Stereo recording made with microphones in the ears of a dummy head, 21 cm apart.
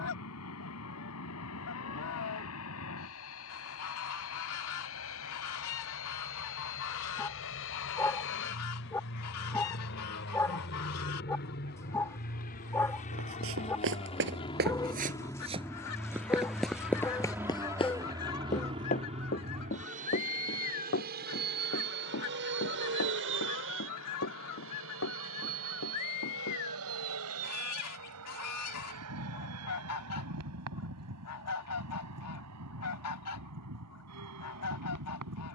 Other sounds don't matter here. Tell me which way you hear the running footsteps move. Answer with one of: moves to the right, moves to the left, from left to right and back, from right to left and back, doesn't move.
moves to the left.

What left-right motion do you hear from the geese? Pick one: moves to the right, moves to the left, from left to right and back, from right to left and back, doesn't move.
doesn't move.